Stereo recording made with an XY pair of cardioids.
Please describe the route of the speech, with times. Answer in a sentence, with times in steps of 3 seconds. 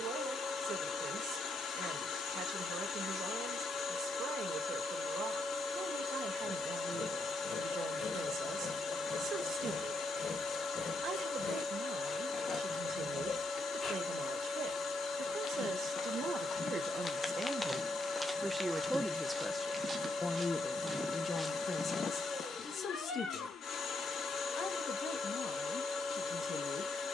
In this clip you hear the speech on the right from 0 s, in the centre from 18 s and on the left from 21 s.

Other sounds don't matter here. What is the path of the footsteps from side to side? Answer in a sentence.
In this clip you hear the footsteps move from left to right and back again.